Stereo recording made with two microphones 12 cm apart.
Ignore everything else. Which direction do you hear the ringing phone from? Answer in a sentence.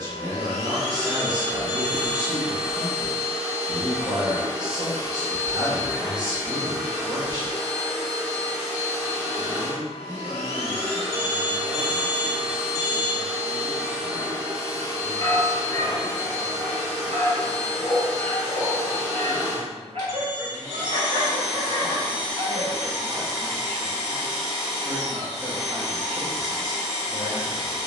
In this clip you hear the ringing phone on the left.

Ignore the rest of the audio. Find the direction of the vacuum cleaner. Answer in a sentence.
You can hear the vacuum cleaner on the right.